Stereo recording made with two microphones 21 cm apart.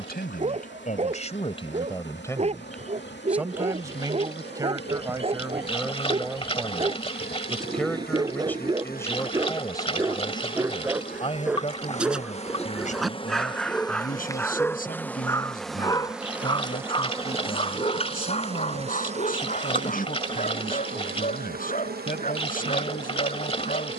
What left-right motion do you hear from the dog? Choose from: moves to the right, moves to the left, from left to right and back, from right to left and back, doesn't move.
moves to the left.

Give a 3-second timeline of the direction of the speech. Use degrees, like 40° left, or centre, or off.
30° left, 10° right, centre, 20° left, 40° left, 50° left, 50° left, 50° left.